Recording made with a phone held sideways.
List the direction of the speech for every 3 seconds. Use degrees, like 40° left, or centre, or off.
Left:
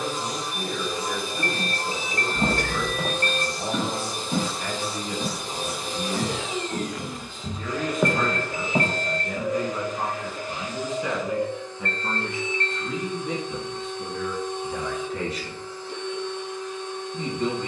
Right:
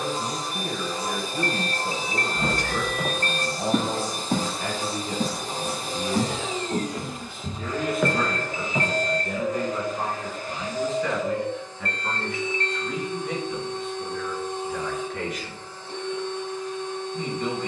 30° right, 30° right, 10° right, 10° left, 30° left, 40° left.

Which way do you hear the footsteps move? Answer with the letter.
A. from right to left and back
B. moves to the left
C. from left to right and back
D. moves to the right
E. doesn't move
C.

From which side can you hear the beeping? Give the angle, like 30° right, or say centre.
60° left.